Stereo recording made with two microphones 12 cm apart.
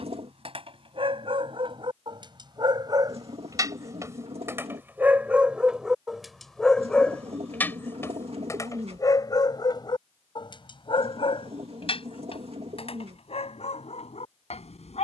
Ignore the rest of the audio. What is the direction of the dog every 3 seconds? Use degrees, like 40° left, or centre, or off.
40° right, 20° right, 10° left, 40° left, 60° left.